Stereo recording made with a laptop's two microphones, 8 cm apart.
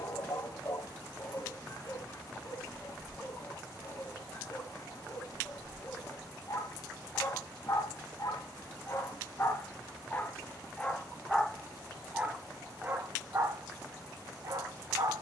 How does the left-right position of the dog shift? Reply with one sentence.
You can hear the dog go from the left side to the right.